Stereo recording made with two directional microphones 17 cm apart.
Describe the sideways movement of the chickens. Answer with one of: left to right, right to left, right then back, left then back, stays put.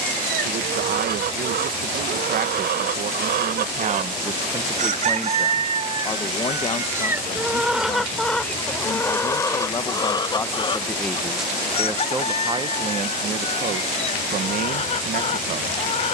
right to left.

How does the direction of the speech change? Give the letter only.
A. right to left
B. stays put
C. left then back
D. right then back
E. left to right
C.